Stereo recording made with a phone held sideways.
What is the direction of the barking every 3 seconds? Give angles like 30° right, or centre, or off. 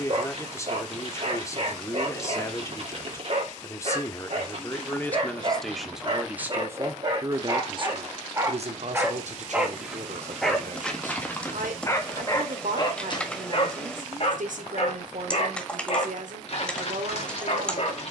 50° right, 40° right, 30° right, 10° left, 40° left, 50° left.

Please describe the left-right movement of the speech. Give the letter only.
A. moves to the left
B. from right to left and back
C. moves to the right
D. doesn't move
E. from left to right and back
C.